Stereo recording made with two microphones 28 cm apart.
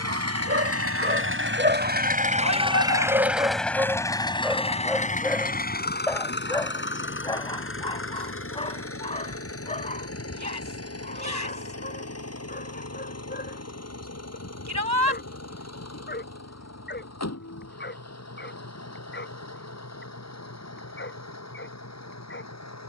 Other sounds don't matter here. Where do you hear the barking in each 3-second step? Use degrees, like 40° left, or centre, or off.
40° right, 10° right, 20° left, 30° left, 30° left, 40° left, 40° left, 40° left.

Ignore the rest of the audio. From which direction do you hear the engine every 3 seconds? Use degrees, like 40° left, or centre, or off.
40° right, 20° left, 40° left, 50° left, 60° left, 60° left, 60° left, 70° left.